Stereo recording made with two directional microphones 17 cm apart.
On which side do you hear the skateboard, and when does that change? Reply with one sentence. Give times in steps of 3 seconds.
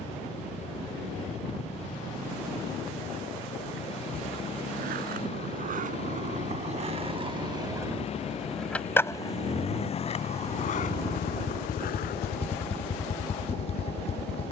In this clip you hear the skateboard not at all from 0 s, on the right from 3 s and on the left from 9 s.